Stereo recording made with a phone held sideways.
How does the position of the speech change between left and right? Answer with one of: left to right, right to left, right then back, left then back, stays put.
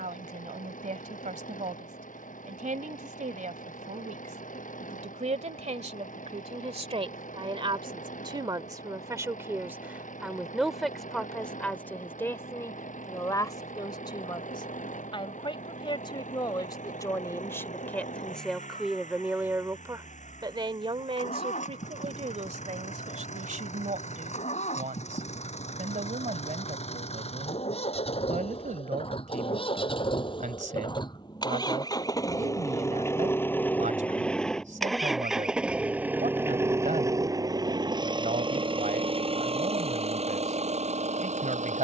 left then back.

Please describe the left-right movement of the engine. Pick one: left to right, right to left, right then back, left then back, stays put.
left to right.